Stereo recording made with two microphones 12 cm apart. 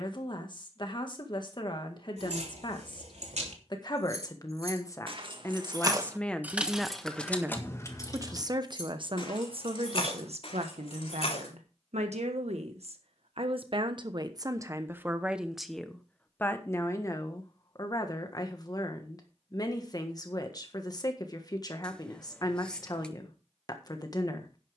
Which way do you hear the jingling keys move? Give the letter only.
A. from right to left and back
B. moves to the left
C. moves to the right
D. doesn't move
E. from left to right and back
B.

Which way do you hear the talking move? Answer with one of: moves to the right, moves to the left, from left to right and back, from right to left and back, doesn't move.
from left to right and back.